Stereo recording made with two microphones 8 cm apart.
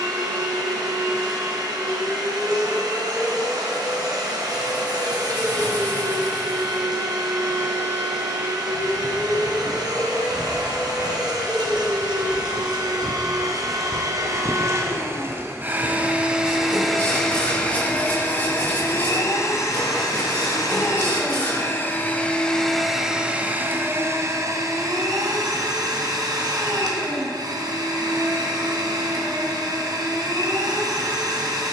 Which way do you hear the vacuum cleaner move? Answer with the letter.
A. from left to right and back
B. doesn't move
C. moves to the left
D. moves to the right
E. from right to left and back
E.